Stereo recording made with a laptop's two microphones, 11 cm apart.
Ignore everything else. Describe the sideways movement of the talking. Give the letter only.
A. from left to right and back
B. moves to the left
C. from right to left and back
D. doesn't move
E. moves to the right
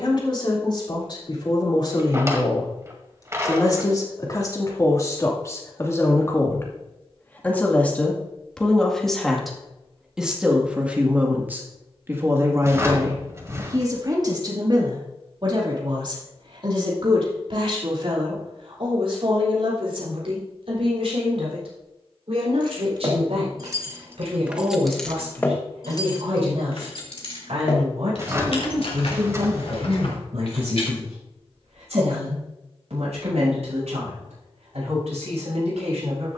E.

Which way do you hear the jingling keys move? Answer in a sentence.
In this clip you hear the jingling keys move to the left.